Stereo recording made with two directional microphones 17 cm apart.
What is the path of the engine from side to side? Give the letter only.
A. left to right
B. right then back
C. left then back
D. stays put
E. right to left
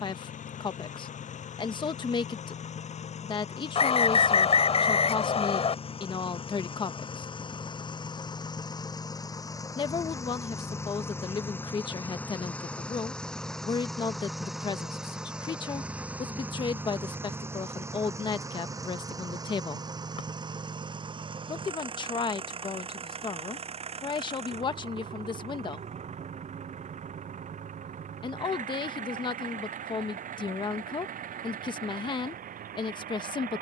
A.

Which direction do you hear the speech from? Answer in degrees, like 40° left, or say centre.
30° left.